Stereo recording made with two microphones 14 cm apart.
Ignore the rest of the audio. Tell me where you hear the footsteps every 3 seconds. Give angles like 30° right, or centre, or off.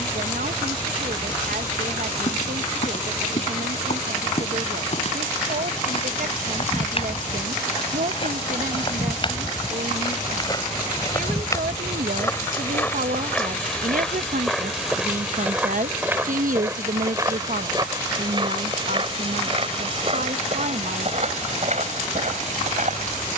50° left, 50° left, 40° left, 30° left, 10° left, 20° right, 40° right, 50° right.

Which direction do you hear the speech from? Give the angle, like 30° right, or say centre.
70° right.